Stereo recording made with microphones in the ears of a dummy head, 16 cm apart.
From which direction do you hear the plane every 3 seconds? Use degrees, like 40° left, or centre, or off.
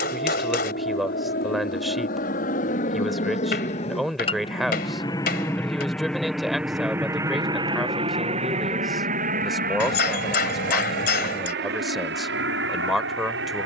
60° left, 30° left, 20° right, 60° right, 70° right.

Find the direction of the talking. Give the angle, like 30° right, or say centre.
centre.